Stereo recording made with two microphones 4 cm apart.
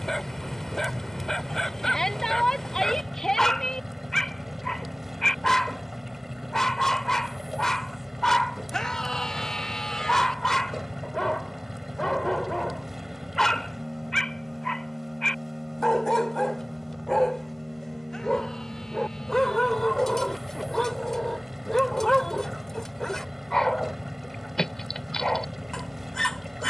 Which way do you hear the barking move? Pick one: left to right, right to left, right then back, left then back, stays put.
stays put.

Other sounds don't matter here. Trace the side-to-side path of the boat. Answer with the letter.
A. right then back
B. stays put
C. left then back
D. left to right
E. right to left
B.